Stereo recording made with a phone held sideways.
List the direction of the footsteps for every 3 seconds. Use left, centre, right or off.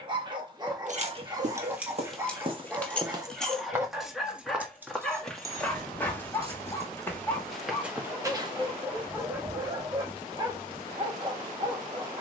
right, centre, centre, off.